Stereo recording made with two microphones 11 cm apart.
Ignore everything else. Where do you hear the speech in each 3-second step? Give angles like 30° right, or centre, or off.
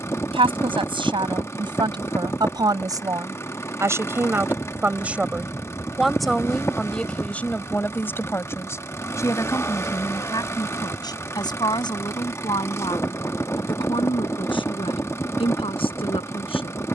50° right, 20° right, 10° left, 40° left, 50° left, 50° left.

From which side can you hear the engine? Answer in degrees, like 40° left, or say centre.
20° left.